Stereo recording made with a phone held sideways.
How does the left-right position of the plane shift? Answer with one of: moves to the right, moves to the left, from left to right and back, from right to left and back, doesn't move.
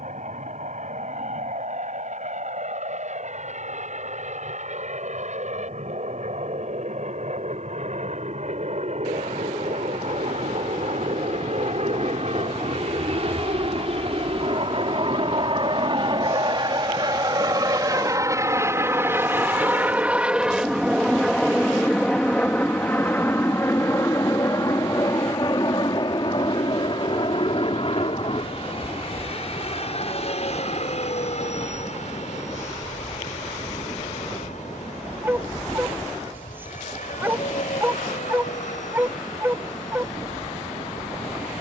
moves to the left.